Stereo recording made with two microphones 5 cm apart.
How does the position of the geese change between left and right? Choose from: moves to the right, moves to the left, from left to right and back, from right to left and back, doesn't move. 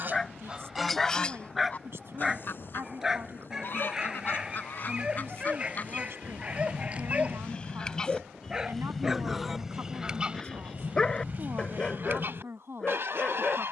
from right to left and back.